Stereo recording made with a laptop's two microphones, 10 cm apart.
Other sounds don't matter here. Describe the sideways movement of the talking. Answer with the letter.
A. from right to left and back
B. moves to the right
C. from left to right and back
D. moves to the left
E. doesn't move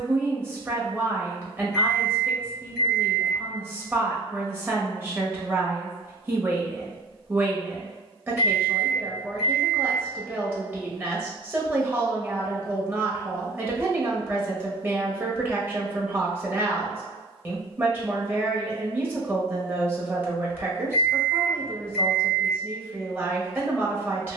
E.